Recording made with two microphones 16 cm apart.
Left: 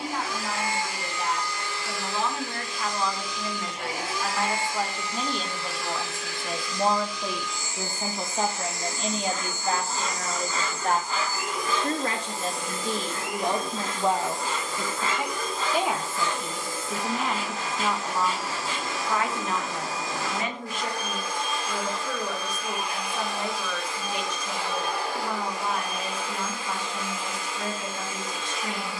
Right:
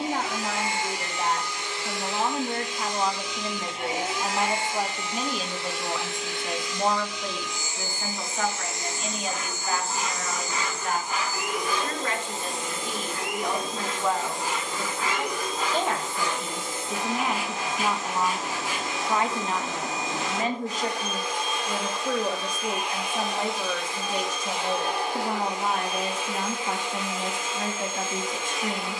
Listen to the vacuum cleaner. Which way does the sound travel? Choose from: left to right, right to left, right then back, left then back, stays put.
stays put.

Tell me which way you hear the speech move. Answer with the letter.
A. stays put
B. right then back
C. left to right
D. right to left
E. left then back
E.